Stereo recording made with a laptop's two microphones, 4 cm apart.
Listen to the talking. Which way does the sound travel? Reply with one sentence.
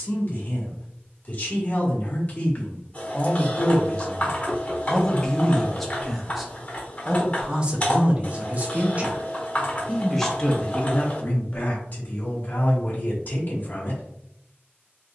You can hear the talking go right and come back.